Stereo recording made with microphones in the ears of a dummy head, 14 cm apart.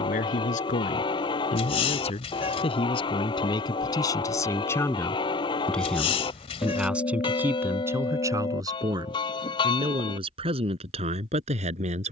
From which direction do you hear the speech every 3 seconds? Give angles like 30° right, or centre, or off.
40° left, 20° left, 10° right, 40° right.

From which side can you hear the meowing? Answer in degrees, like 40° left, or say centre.
40° left.